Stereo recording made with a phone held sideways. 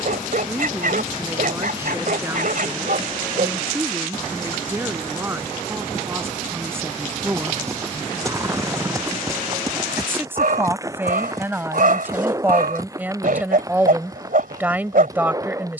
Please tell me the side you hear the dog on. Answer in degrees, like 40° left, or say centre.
70° right.